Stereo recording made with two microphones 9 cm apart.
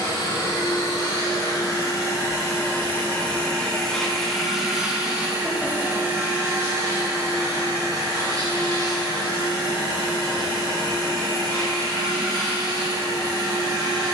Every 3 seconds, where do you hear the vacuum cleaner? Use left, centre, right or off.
left, centre, right, right, right.